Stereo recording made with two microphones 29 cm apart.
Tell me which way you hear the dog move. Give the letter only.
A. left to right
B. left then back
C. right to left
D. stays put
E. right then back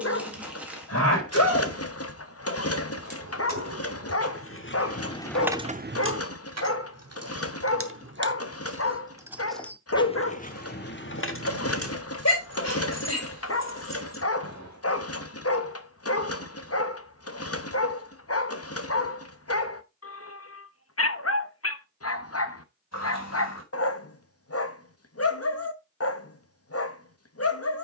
D.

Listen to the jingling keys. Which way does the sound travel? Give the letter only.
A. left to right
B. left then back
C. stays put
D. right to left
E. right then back
E.